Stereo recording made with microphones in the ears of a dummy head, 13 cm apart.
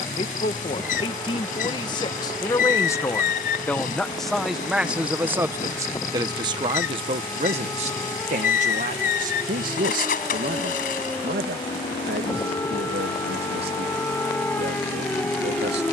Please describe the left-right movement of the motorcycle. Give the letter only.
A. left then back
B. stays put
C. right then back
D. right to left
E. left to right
B.